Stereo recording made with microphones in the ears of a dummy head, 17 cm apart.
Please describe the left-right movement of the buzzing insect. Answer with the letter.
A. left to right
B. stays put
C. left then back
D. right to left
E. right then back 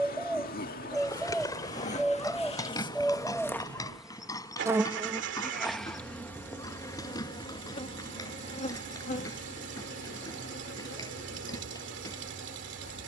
E.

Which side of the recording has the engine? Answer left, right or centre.
right.